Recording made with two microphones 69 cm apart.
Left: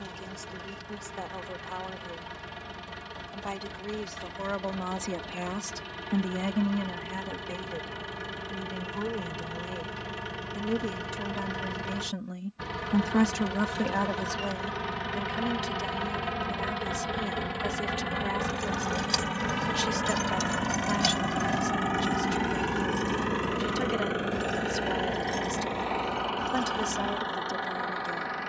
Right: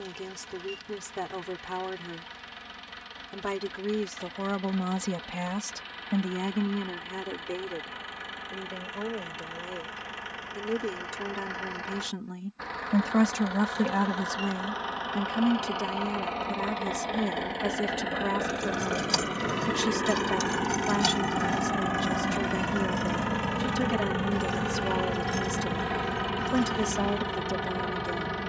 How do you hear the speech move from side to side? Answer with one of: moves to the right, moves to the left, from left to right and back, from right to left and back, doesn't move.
from right to left and back.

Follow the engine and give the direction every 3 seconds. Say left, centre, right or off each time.
left, left, left, left, left, left, left, centre, right, right.